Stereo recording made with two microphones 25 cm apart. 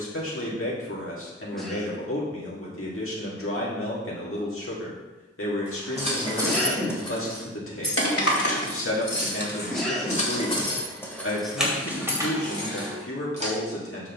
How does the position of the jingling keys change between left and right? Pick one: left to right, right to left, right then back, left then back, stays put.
left then back.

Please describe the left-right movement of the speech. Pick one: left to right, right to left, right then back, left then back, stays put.
stays put.